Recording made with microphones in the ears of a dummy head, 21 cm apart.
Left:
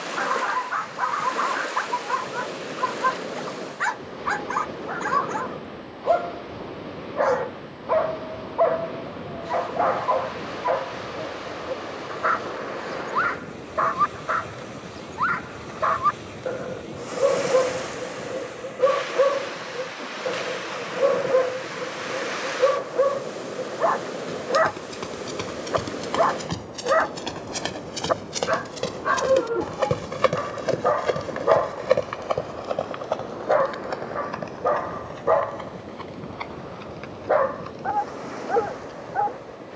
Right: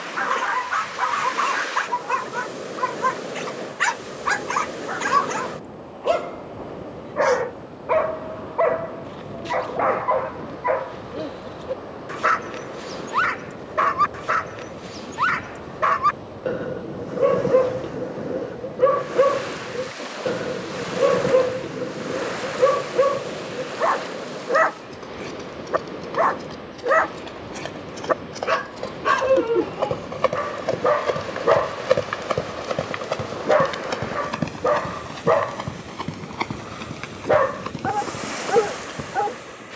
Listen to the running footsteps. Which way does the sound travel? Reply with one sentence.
In this clip you hear the running footsteps go from the left side to the right.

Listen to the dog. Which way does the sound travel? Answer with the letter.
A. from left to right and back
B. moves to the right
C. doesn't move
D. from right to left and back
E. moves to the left
C.